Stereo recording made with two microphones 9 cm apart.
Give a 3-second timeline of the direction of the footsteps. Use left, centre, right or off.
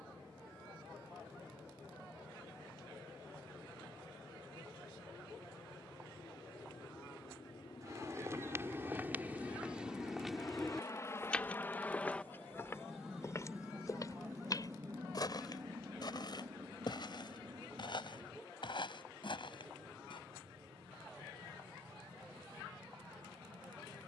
off, off, right, centre, left, left, left, off.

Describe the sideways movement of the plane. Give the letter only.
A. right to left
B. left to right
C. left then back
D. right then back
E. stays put
B.